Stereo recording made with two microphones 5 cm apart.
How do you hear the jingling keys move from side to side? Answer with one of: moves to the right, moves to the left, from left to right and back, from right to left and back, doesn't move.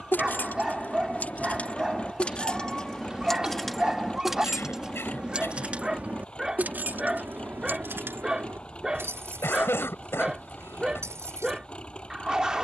moves to the right.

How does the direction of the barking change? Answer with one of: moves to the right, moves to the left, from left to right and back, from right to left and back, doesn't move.
doesn't move.